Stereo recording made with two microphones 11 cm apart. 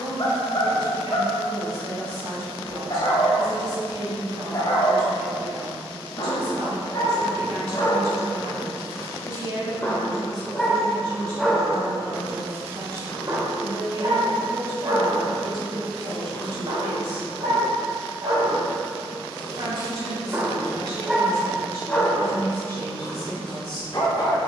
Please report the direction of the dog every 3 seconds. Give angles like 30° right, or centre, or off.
50° left, 50° left, 40° left, 10° left, 40° right, 60° right, 40° right, 10° left.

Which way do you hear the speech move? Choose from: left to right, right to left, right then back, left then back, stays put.
stays put.